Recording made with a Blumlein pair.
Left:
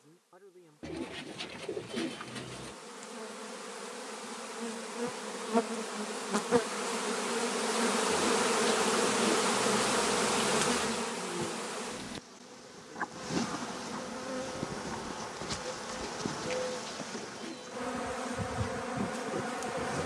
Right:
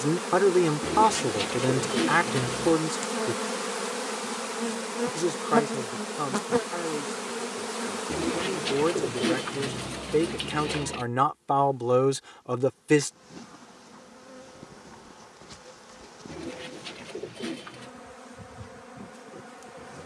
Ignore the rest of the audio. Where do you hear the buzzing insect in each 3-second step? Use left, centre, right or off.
right, right, centre, left, left, left, left.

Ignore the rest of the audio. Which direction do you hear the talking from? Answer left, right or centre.
right.